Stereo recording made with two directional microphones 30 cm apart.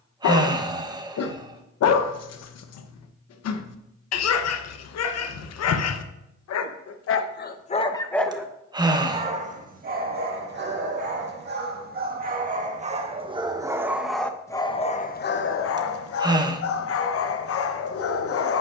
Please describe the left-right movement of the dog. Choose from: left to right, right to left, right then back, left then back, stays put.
right then back.